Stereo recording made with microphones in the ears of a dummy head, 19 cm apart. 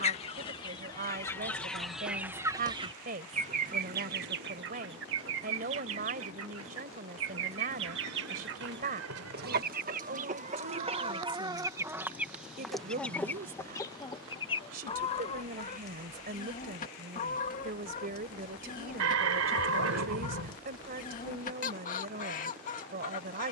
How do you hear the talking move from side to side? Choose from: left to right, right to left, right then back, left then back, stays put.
stays put.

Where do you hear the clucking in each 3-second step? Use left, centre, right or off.
centre, right, right, right, centre, left, left, left.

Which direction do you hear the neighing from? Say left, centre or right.
right.